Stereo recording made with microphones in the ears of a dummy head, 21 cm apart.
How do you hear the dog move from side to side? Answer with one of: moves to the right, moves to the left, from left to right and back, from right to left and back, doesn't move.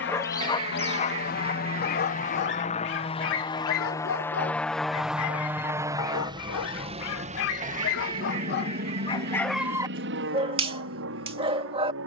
from right to left and back.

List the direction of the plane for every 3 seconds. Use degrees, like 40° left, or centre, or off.
40° left, 10° left, 30° right, 50° right.